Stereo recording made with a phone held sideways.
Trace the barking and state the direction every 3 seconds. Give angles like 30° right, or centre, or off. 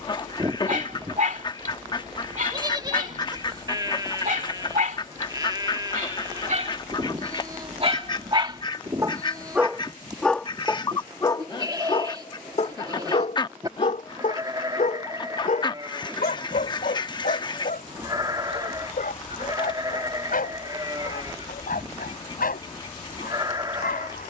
60° right, 60° right, 40° right, 10° left, 50° left, 70° left, 70° left, 80° left.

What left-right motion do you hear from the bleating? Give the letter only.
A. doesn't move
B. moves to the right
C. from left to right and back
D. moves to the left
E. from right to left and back
A.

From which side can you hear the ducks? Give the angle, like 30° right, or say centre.
30° left.